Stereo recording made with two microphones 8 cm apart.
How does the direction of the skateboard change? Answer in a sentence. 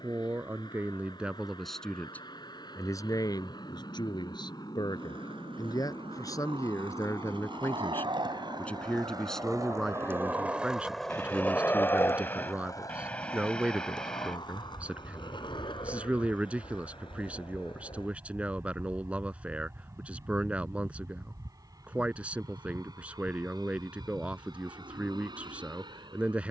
In this clip you hear the skateboard go from the right side to the left.